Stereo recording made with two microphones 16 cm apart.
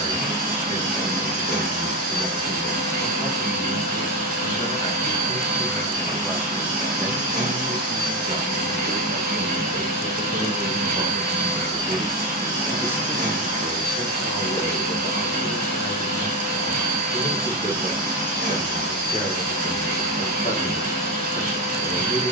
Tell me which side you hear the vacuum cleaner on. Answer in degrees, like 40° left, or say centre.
60° right.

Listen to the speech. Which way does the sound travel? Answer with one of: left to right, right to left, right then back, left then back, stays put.
right then back.